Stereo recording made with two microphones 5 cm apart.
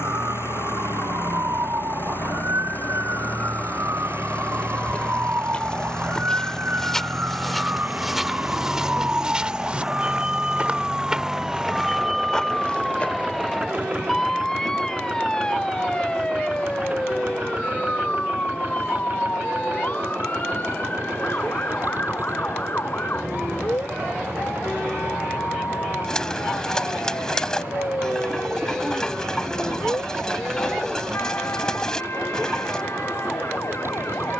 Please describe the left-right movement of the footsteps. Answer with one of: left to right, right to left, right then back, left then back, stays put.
right then back.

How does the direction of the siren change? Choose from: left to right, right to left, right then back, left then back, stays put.
right to left.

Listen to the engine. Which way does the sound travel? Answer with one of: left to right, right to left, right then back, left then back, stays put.
left to right.